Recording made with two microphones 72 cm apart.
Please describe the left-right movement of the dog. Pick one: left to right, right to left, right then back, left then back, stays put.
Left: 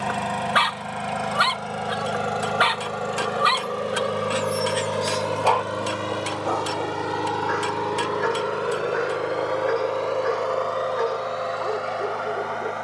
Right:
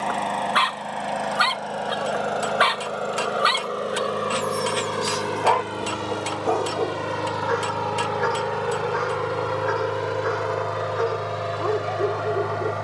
left to right.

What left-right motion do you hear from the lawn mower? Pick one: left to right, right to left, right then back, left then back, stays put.
left to right.